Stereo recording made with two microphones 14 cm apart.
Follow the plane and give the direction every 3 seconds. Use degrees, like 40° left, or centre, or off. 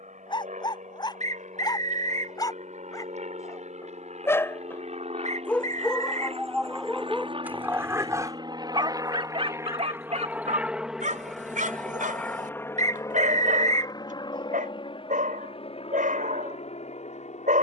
70° right, 60° right, 40° right, 10° right, 20° left, 50° left.